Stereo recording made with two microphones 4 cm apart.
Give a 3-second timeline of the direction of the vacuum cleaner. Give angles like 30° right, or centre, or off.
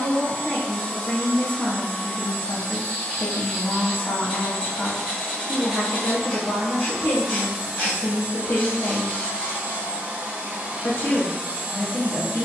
30° left, 20° left, 20° right, 30° right.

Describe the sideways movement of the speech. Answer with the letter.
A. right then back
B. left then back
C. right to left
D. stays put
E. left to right
D.